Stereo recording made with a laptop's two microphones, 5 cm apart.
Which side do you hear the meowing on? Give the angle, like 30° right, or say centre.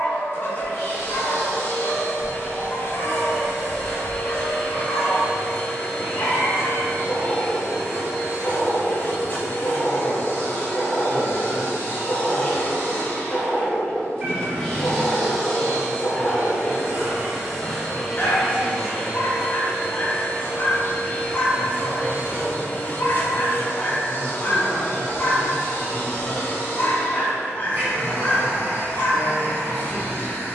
30° right.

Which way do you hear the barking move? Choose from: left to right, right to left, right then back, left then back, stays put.
stays put.